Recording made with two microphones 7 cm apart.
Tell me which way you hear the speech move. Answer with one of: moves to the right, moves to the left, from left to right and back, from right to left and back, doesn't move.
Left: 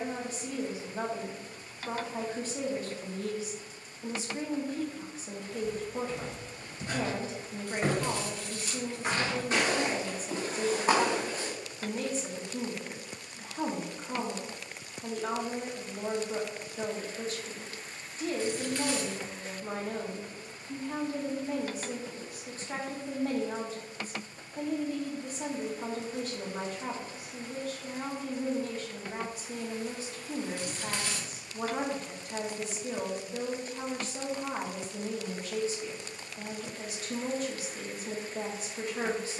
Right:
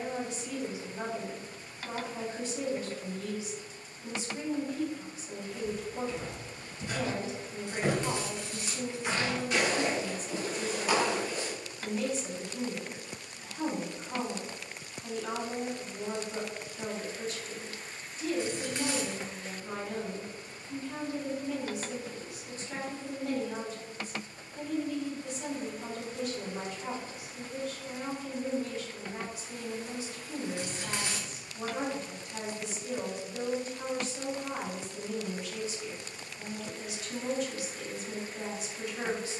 doesn't move.